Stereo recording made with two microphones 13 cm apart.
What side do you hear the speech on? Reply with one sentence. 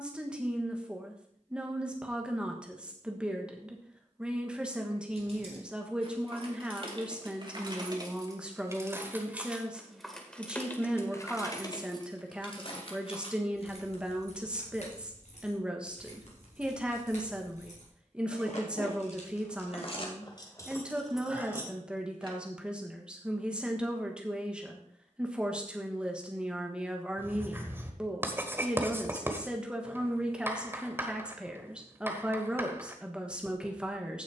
In this clip you hear the speech in the centre.